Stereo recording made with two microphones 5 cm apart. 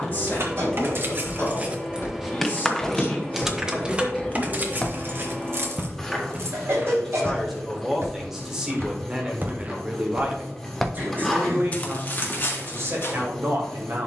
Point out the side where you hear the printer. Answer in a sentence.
In this clip you hear the printer in the centre.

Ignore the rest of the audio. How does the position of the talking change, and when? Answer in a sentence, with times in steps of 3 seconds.
In this clip you hear the talking on the left from 0 s, in the centre from 6 s and on the right from 9 s.